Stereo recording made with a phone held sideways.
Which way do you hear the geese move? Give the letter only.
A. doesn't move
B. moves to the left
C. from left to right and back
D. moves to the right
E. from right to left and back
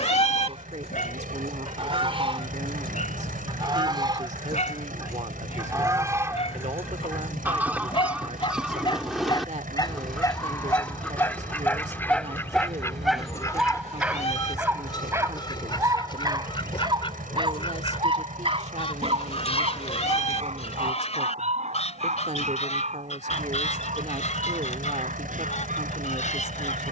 B.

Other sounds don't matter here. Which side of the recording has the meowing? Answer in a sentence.
You can hear the meowing on the left.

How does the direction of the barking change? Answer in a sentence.
You can hear the barking move from left to right.